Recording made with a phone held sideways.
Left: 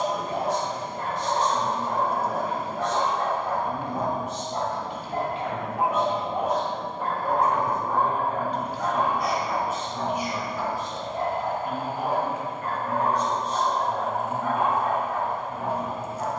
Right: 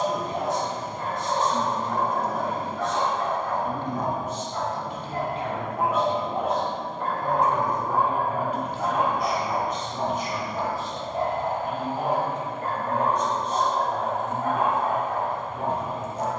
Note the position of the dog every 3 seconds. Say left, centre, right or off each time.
left, left, centre, right, right, right.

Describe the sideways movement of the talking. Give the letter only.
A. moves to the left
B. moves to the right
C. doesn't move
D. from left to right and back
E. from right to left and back
A.